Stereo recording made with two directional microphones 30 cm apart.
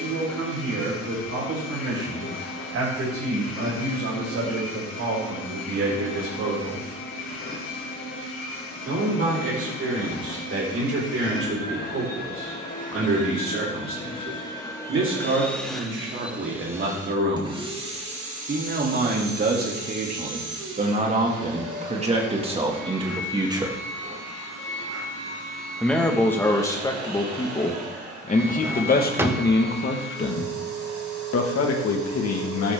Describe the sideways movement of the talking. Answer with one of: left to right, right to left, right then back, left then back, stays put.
right to left.